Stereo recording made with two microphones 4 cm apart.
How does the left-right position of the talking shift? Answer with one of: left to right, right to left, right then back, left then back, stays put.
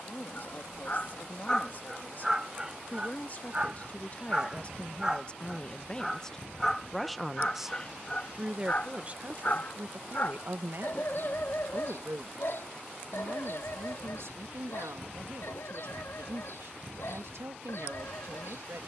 left to right.